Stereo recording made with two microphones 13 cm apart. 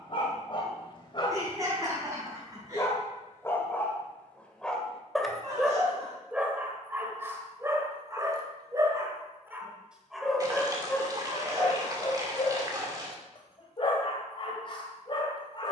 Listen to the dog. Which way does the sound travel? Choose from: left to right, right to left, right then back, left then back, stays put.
right then back.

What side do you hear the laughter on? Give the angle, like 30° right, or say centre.
30° right.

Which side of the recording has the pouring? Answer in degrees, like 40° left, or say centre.
30° right.